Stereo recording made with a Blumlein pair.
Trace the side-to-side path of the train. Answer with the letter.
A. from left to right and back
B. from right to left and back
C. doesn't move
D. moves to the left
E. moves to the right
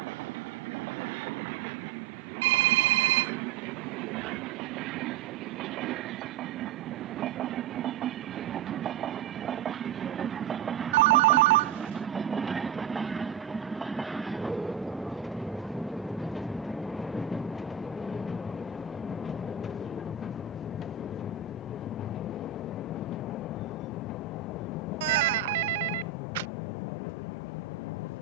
D.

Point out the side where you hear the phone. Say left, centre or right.
right.